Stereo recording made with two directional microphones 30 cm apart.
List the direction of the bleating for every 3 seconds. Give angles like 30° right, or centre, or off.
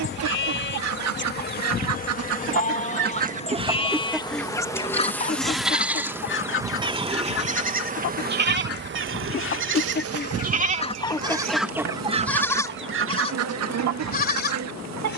30° left, 10° left, 30° right, 30° right, 20° left.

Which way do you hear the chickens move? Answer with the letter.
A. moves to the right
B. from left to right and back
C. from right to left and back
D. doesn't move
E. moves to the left
C.